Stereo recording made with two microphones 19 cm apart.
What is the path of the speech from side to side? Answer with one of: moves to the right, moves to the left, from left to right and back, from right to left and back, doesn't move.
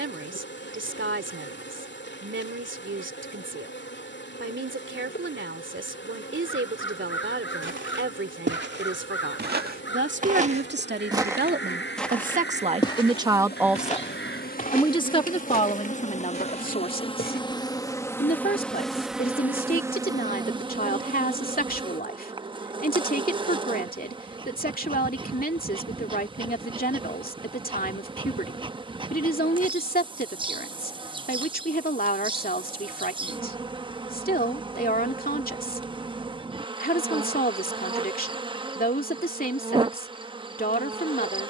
moves to the left.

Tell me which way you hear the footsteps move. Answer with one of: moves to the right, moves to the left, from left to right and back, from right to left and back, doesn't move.
moves to the left.